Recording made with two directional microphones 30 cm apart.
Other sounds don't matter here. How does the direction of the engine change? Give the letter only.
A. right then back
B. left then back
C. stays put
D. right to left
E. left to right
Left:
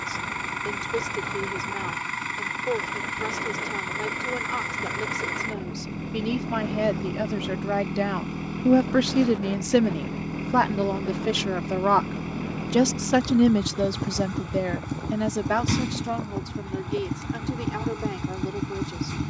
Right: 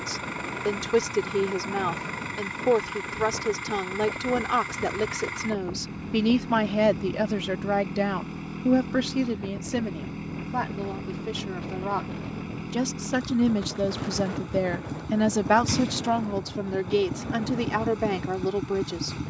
C.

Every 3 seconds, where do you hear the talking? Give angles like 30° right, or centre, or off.
50° right, 50° right, 10° right, 50° left, 20° left, 40° right, 40° right.